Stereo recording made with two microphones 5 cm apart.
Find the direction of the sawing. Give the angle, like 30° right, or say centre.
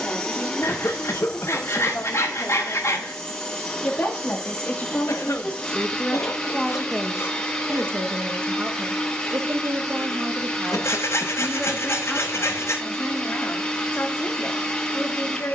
60° left.